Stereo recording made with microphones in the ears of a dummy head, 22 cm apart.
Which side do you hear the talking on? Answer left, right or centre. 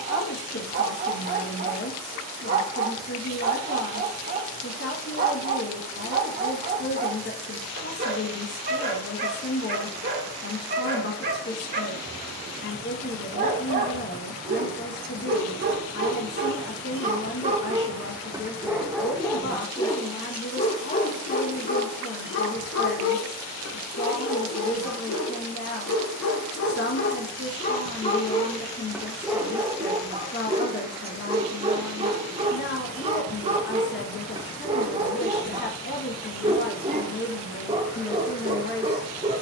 left.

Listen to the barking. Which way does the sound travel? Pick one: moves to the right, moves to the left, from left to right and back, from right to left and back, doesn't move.
from right to left and back.